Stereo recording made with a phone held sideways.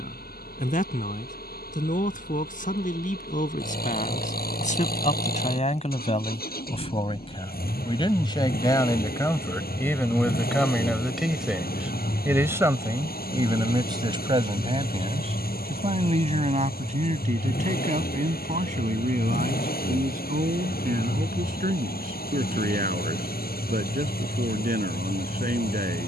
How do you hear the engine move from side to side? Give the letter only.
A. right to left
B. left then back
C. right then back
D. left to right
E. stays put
E.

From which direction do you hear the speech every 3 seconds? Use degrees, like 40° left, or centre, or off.
60° left, 50° left, 30° left, 10° left, 30° right, 50° right, 60° right, 70° right, 70° right.